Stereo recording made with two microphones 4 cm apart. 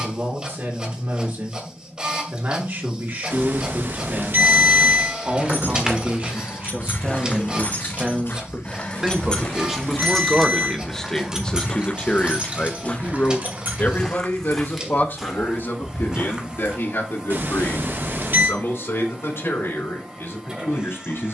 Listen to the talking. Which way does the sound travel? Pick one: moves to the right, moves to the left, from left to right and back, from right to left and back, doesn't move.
moves to the left.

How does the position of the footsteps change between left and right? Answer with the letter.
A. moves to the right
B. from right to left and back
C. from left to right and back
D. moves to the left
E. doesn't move
B.